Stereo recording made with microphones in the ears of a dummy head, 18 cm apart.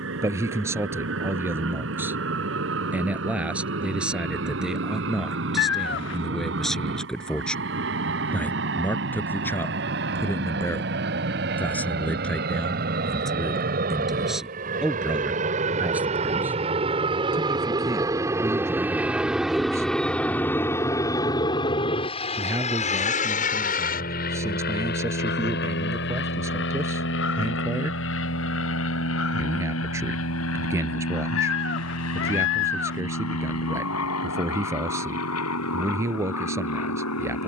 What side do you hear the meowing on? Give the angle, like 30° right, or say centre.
60° left.